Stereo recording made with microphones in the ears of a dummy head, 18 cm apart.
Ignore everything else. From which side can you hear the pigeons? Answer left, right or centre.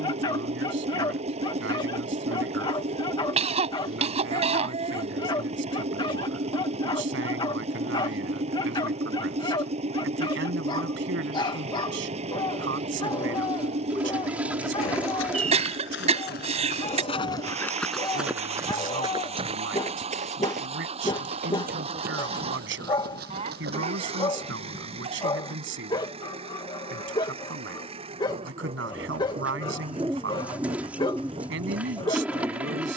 centre.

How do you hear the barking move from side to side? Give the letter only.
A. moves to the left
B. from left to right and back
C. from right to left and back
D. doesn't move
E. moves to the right
D.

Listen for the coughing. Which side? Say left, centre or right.
right.